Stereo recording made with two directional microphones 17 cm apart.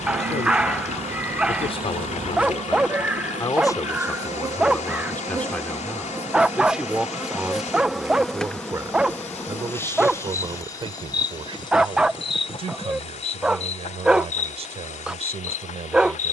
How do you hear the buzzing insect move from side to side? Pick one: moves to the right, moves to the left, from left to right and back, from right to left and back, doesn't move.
moves to the left.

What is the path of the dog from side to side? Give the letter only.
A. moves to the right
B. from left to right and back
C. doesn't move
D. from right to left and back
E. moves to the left
C.